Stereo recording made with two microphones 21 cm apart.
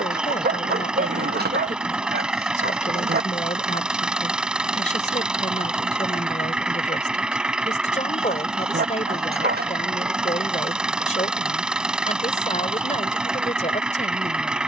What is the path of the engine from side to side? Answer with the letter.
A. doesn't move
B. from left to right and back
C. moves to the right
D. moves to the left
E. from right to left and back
A.